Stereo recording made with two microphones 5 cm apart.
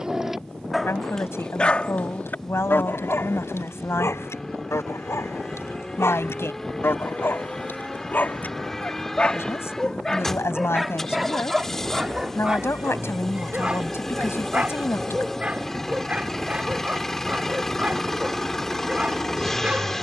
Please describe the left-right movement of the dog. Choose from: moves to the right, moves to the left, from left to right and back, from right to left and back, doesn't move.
from right to left and back.